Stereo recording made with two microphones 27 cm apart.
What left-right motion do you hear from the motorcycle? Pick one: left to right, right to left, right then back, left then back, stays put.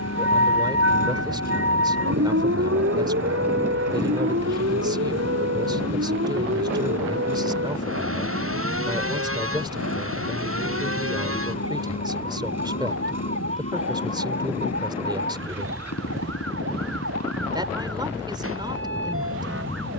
stays put.